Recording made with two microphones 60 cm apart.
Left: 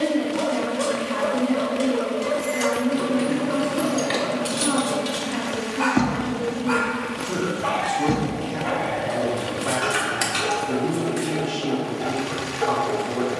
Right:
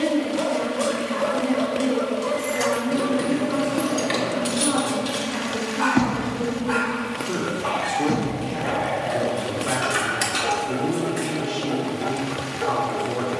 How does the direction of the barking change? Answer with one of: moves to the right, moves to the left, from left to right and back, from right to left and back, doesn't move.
from right to left and back.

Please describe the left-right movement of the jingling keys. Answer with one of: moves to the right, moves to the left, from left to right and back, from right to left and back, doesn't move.
moves to the left.